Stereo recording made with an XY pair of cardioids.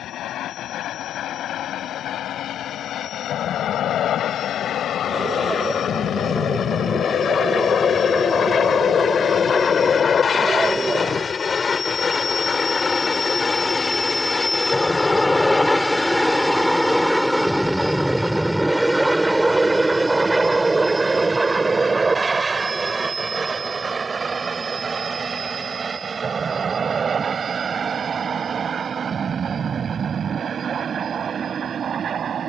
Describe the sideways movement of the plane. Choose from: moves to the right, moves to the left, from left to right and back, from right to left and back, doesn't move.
moves to the right.